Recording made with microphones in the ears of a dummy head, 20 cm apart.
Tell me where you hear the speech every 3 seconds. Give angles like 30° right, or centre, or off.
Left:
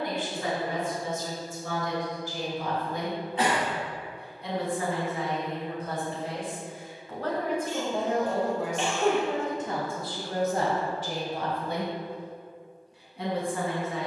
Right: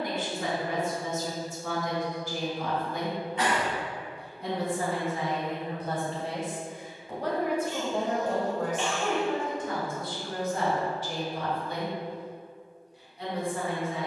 40° right, 40° right, 10° right, 30° left, 60° left.